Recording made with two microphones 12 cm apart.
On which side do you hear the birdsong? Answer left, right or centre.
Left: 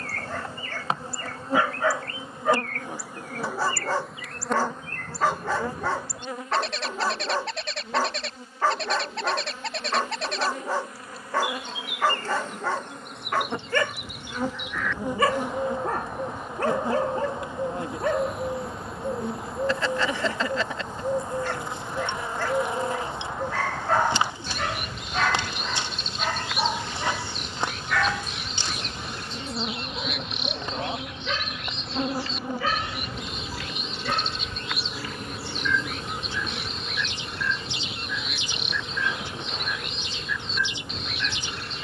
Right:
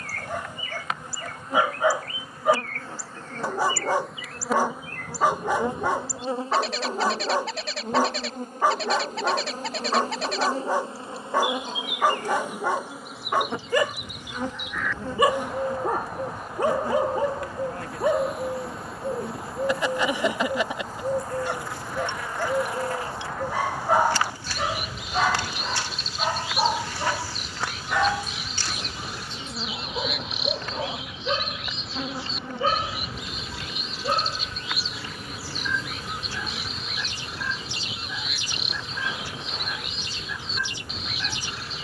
centre.